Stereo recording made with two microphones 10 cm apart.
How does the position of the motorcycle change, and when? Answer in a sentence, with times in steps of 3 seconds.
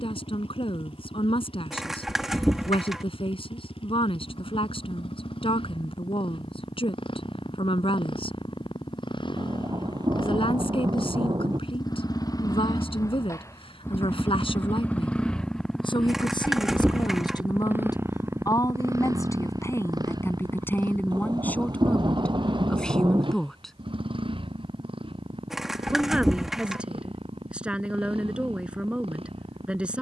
You can hear the motorcycle on the left from 0 s, in the centre from 15 s and on the right from 18 s.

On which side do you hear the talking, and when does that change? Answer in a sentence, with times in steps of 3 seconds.
You can hear the talking on the left from 0 s and in the centre from 21 s.